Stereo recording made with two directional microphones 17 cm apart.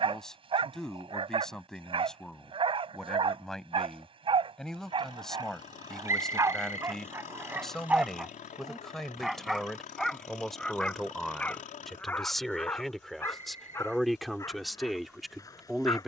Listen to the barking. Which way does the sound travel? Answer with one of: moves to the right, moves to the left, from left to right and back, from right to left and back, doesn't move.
moves to the left.